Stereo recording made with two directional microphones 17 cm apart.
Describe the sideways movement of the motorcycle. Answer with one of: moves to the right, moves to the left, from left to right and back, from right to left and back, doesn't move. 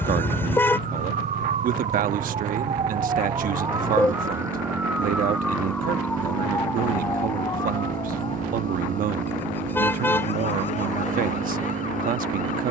doesn't move.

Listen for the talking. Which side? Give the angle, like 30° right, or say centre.
60° right.